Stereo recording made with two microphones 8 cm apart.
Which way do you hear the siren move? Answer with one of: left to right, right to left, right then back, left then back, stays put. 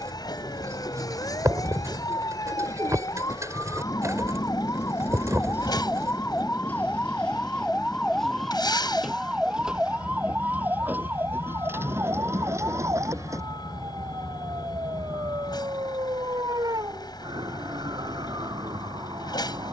left to right.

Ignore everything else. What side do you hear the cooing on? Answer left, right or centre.
right.